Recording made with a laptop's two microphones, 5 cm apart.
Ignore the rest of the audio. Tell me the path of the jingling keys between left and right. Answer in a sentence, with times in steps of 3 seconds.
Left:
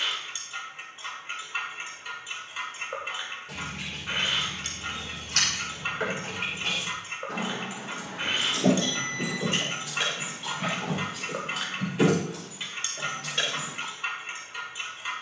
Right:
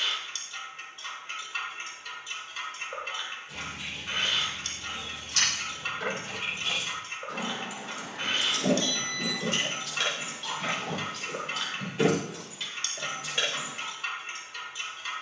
In this clip you hear the jingling keys not at all from 0 s, on the left from 3 s and in the centre from 9 s.